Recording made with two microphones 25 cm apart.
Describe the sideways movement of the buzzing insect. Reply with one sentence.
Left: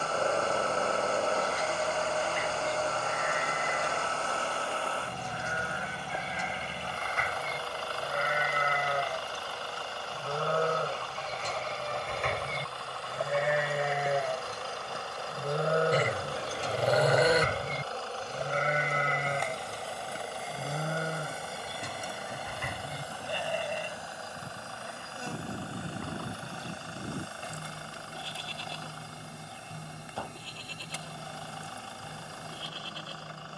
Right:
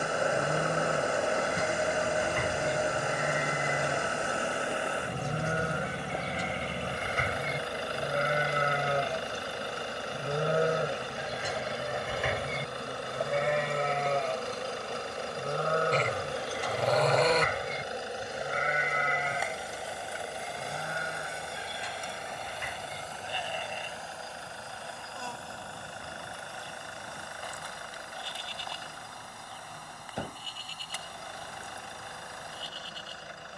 In this clip you hear the buzzing insect travel towards the left.